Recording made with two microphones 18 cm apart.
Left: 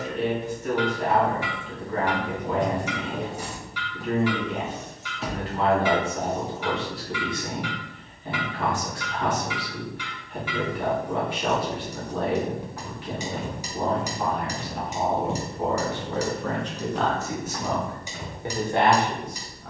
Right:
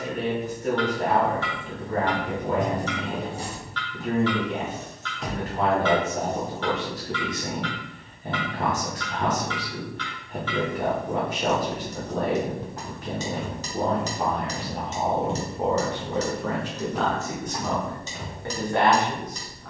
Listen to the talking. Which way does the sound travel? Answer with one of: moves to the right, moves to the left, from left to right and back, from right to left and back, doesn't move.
moves to the left.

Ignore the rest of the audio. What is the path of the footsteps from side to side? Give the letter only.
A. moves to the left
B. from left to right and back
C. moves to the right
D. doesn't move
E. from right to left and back
E.